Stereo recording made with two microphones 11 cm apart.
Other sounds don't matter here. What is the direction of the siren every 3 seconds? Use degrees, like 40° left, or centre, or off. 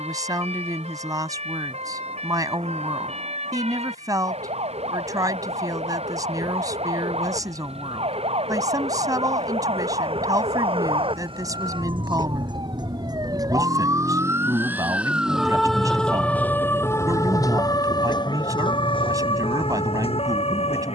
80° right, 70° right, 70° right, 60° right, 30° right, 10° left, 50° left.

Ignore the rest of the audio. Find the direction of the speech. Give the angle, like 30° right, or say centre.
30° right.